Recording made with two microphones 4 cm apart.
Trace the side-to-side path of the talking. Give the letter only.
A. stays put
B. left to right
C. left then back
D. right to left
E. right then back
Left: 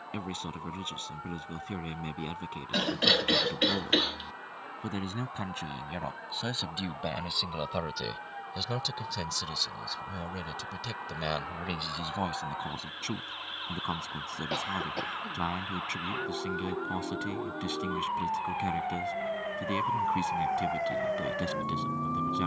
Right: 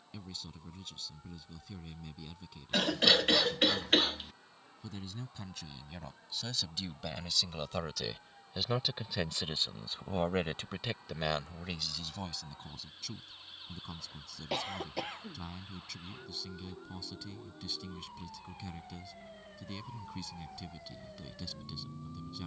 E.